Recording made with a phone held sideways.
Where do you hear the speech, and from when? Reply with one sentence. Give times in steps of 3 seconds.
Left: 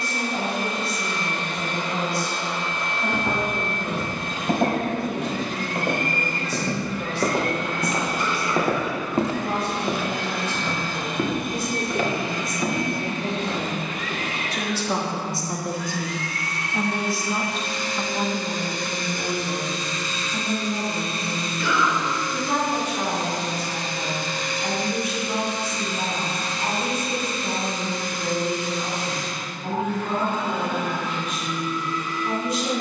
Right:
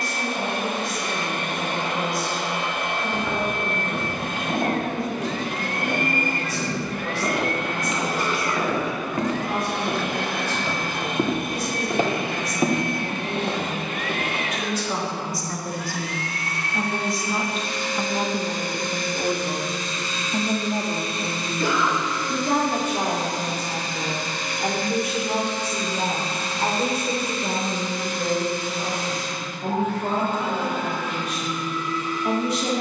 You can hear the speech on the left from 0 s, in the centre from 15 s and on the right from 18 s.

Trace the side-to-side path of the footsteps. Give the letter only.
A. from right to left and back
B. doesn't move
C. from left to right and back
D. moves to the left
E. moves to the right
E.